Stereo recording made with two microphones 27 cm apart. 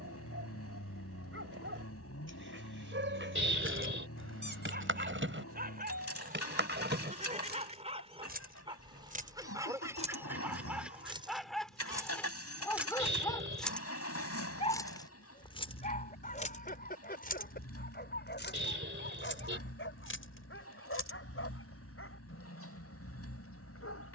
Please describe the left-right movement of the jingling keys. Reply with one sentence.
In this clip you hear the jingling keys go from the right side to the left.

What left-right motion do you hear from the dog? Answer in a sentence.
You can hear the dog go from the right side to the left.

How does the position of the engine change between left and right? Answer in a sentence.
You can hear the engine stay put.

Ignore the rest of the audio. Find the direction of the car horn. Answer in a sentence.
In this clip you hear the car horn on the right.